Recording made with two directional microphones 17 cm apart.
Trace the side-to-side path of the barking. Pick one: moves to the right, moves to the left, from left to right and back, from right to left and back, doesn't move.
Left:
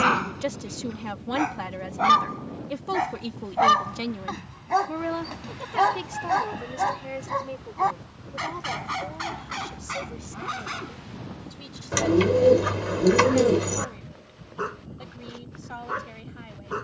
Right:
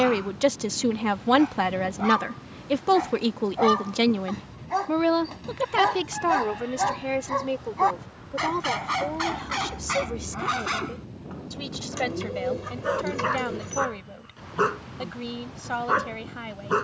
moves to the right.